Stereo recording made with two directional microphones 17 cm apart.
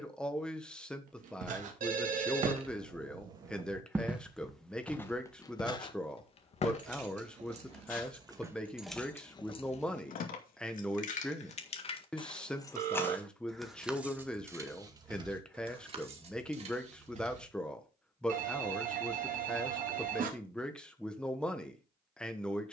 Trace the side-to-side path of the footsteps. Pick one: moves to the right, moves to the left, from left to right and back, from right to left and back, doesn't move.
moves to the left.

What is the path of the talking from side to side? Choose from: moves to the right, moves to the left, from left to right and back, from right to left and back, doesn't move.
doesn't move.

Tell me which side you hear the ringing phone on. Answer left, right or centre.
right.